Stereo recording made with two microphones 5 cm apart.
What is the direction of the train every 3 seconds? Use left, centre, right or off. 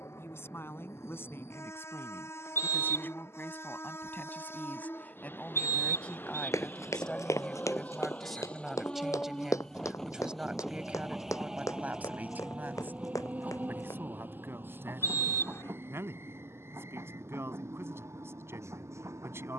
left, left, left, centre, right, right, right.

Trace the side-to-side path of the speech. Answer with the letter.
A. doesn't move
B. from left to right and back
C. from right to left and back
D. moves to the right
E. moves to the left
D.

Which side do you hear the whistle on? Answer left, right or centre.
left.